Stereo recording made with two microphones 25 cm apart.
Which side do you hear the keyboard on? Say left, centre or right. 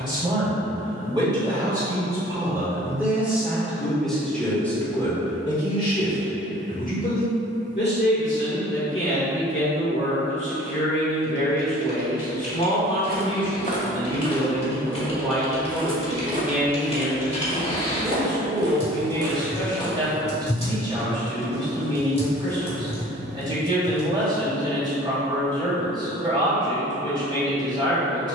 left.